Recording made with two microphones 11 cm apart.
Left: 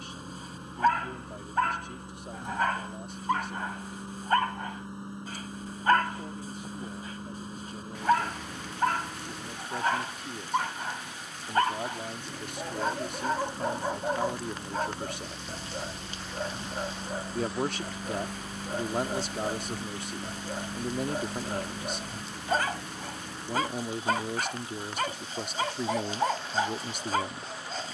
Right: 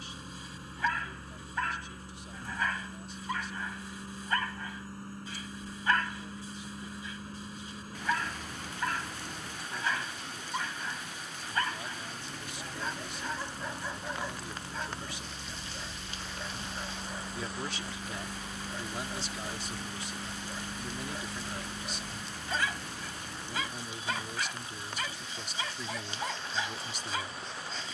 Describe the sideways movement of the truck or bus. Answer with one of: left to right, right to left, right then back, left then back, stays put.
stays put.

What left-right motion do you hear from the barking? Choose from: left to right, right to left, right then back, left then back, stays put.
stays put.